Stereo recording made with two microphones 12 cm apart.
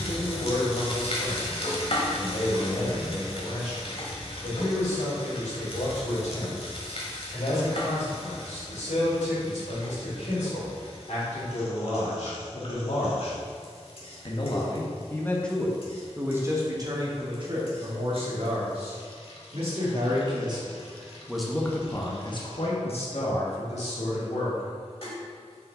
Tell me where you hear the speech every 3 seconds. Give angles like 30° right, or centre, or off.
80° left, 80° left, 80° left, 80° left, 60° left, 20° right, 50° right, 40° left, 70° left.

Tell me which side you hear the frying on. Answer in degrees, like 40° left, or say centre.
50° left.